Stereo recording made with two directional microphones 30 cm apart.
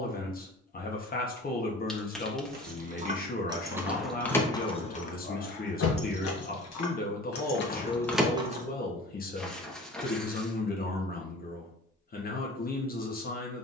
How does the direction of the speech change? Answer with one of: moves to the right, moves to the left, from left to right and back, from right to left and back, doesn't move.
doesn't move.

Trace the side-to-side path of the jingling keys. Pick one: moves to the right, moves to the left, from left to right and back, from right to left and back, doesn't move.
from right to left and back.